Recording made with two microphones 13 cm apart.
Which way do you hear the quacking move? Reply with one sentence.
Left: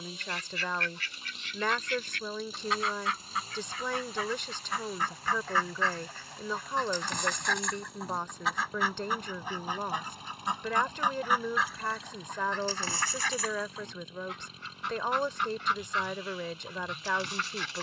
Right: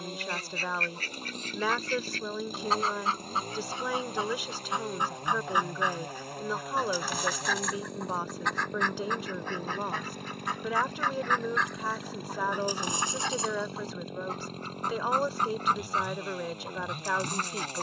You can hear the quacking go left and come back.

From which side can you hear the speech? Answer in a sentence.
In this clip you hear the speech in the centre.